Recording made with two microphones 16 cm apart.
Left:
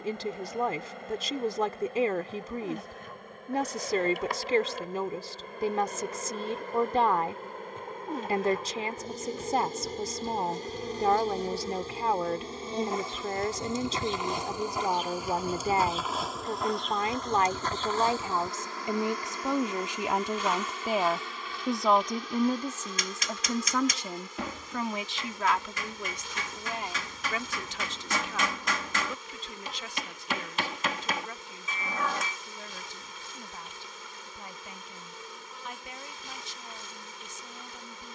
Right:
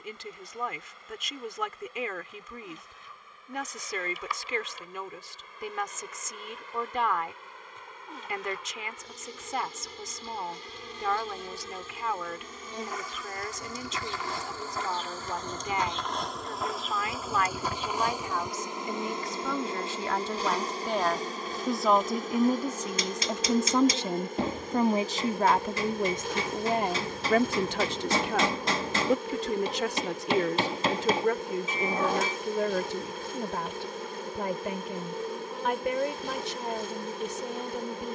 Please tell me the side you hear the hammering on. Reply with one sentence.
You can hear the hammering on the right.